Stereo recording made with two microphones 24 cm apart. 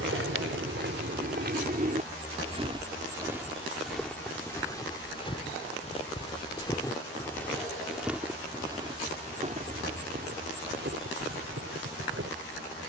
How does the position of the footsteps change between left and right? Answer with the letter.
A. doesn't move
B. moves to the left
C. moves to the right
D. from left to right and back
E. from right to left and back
E.